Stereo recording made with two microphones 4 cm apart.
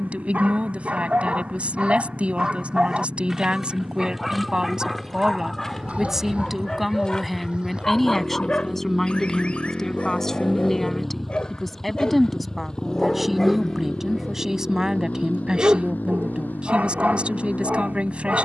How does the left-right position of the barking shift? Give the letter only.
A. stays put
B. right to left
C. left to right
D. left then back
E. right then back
D.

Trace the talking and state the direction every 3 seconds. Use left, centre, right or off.
right, right, centre, centre, centre, right.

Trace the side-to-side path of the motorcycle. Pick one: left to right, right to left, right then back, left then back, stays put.
right to left.